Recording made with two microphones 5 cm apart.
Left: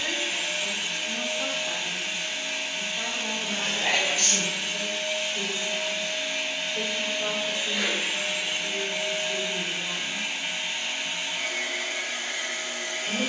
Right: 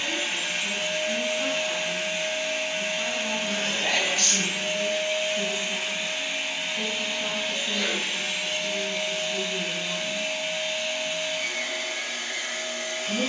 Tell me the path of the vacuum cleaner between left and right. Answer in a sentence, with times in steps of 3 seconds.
You can hear the vacuum cleaner on the right from 0 s, in the centre from 6 s and on the left from 9 s.